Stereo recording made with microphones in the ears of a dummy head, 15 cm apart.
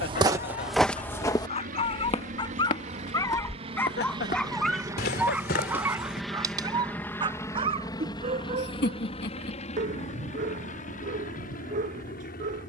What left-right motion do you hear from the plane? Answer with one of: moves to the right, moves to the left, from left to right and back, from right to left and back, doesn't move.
moves to the left.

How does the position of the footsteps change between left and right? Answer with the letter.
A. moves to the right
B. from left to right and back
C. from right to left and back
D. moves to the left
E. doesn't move
D.